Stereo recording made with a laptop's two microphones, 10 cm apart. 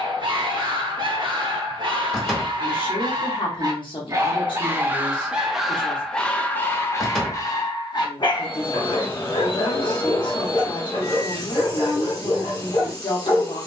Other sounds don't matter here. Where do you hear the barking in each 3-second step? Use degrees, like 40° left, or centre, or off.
50° right, 20° right, 30° left, 60° left, 70° left.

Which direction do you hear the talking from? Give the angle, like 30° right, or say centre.
50° left.